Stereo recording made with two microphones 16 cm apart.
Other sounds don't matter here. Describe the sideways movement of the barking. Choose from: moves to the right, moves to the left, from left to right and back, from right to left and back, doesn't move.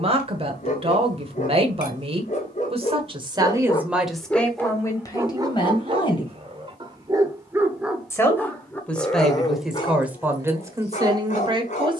from left to right and back.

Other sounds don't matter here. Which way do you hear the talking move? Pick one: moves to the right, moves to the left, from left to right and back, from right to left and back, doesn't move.
from right to left and back.